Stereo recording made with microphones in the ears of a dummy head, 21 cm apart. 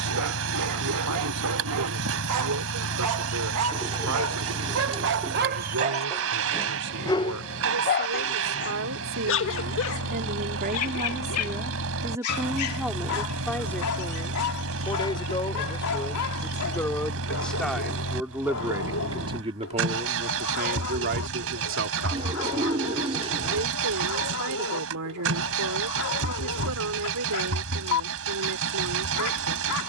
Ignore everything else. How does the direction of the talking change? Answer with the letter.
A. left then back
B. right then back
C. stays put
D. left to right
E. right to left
A.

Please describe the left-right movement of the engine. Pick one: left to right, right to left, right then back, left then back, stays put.
stays put.